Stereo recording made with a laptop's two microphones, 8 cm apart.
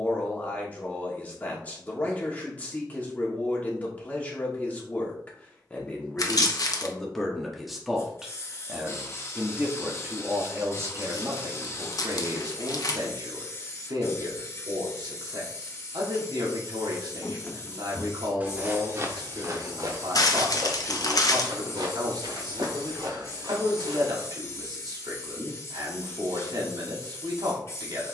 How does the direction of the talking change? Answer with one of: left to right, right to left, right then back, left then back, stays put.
left to right.